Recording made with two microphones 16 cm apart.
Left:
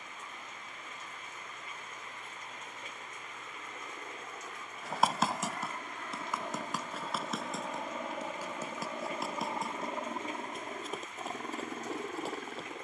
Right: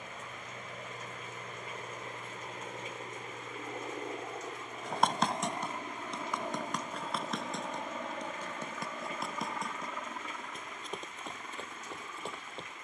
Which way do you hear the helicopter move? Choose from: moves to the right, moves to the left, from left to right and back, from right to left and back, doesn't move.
moves to the left.